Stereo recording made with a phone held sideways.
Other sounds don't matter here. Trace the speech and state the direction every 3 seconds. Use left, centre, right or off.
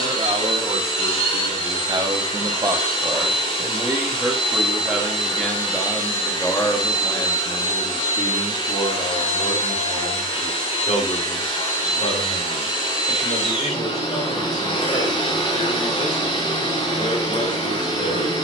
right, centre, left, left, left, left.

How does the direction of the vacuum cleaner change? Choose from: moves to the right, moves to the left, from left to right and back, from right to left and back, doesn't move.
doesn't move.